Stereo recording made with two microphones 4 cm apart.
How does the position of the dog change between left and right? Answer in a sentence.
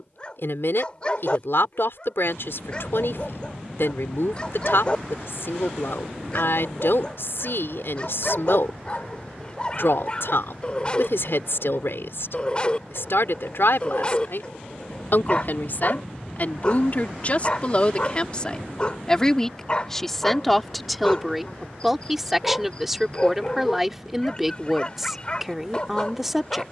You can hear the dog stay in one place.